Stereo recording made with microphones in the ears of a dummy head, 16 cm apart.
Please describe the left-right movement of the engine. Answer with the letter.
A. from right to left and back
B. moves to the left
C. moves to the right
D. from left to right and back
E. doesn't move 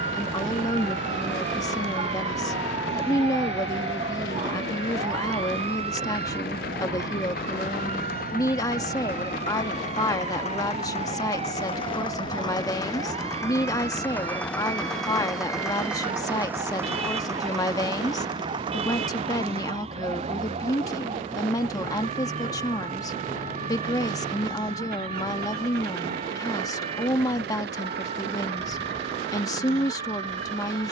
C.